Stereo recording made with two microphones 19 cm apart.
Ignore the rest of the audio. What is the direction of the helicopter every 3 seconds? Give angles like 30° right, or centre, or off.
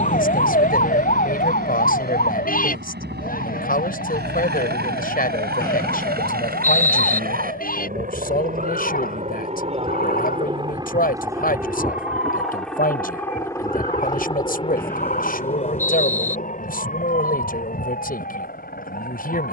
70° right, 70° right, 50° right, 30° right, 10° left, 40° left, 60° left.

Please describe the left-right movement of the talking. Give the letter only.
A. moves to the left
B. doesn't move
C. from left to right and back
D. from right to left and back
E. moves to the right
B.